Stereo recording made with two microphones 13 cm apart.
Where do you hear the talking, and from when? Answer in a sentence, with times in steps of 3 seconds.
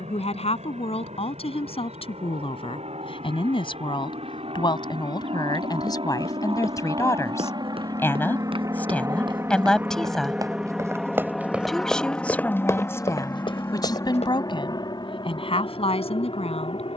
You can hear the talking on the left from 0 s, in the centre from 9 s and on the left from 12 s.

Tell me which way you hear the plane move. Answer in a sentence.
You can hear the plane go from the right side to the left.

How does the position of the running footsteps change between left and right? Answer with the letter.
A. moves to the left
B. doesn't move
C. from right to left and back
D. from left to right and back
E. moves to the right
A.